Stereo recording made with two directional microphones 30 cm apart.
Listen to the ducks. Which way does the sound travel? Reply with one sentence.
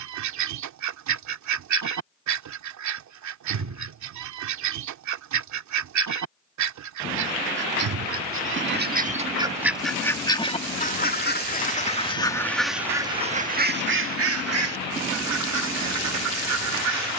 In this clip you hear the ducks move from right to left and back again.